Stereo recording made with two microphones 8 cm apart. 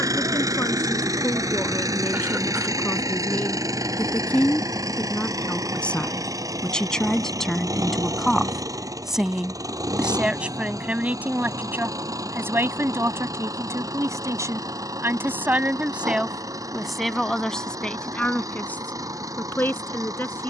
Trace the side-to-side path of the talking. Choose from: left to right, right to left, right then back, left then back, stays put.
right then back.